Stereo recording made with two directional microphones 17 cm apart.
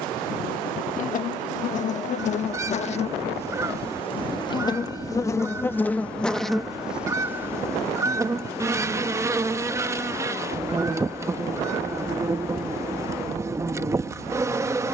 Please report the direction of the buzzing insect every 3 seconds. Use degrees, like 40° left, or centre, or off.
50° left, 20° left, 10° right, 20° right, 20° right.